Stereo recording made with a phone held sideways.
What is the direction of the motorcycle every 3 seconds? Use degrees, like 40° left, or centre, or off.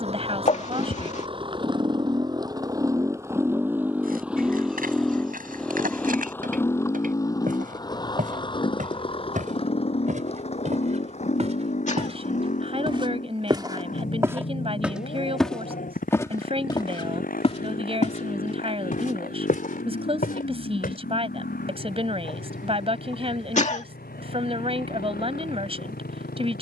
30° right, 10° right, 20° left, 40° left, 50° left, 60° left, 70° left, 70° left, 70° left.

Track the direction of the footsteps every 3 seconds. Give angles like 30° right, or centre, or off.
off, 60° right, 60° right, 50° right, 20° right, 20° left, 60° left, off, off.